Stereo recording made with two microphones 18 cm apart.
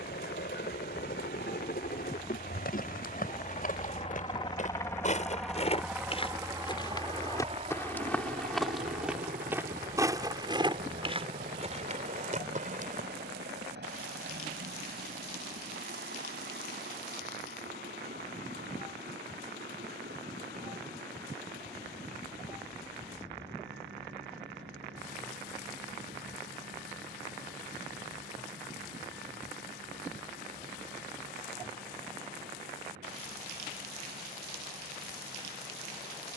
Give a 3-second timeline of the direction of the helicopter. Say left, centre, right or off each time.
left, left, right, right, right, right, right, right, right, right, right, right.